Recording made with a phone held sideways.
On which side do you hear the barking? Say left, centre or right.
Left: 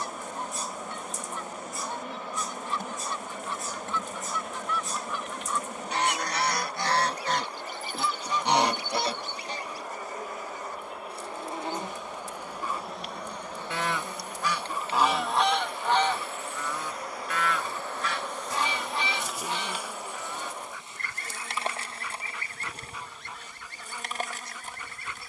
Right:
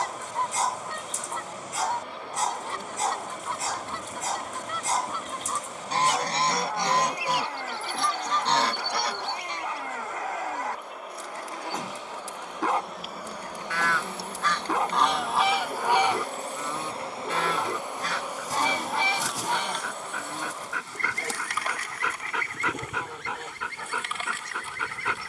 right.